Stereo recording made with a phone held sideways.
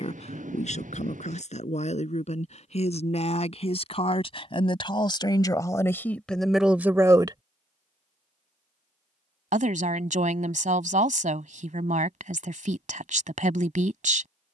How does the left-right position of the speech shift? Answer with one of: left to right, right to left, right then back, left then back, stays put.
left to right.